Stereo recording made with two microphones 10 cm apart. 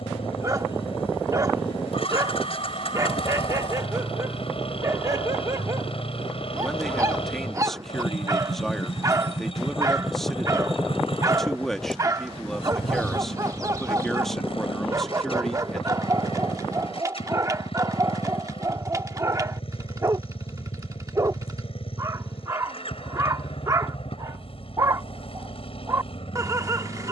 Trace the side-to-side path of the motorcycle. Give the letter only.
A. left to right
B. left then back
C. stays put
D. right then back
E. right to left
C.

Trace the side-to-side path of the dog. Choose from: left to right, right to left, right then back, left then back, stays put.
stays put.